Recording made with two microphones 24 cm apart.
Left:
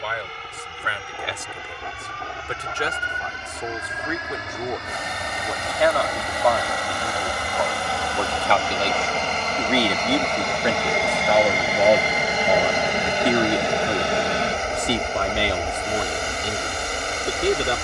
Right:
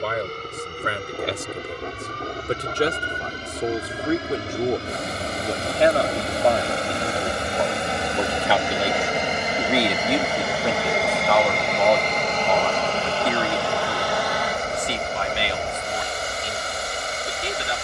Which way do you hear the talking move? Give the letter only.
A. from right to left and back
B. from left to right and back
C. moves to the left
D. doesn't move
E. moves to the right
C.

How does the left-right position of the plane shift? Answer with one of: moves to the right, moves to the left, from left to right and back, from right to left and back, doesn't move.
moves to the left.